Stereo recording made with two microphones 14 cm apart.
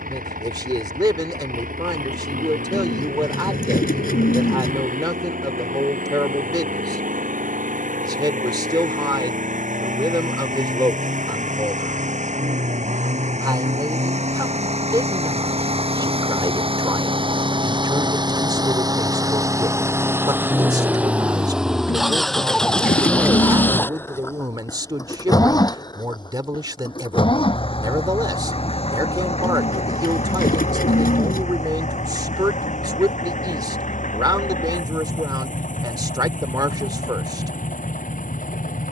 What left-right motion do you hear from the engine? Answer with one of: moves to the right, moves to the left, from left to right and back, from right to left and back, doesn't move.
moves to the left.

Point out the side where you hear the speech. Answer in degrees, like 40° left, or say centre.
30° right.